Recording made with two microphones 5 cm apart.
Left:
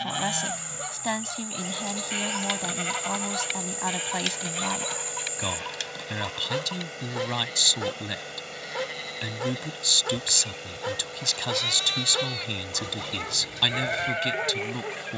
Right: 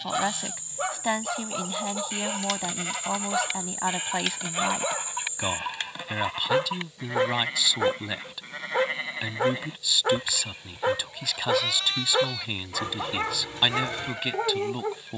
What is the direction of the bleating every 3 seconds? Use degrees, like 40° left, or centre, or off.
30° left, 10° right, 30° right, 20° right, 20° left.